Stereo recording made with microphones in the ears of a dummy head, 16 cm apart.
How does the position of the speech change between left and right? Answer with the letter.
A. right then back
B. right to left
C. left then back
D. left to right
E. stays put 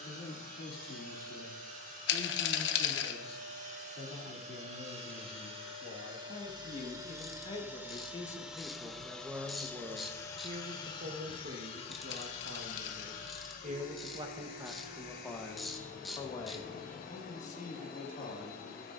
A.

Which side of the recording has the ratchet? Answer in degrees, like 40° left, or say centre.
centre.